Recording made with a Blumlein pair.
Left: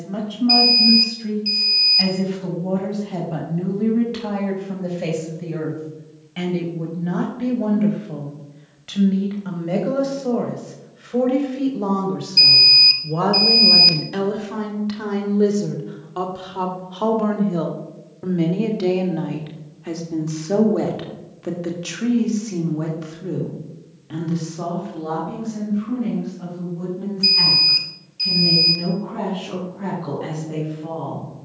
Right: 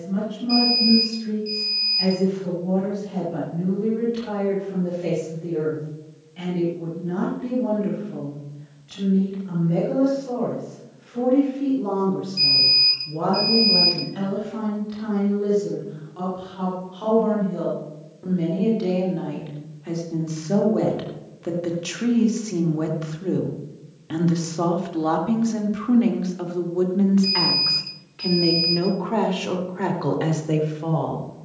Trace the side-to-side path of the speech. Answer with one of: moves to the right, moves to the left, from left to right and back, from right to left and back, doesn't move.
moves to the right.